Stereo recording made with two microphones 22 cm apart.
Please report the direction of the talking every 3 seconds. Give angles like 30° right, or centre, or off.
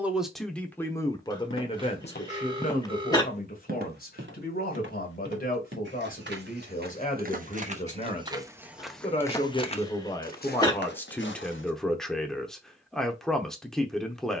20° left, 40° left, 30° left, 10° left, centre.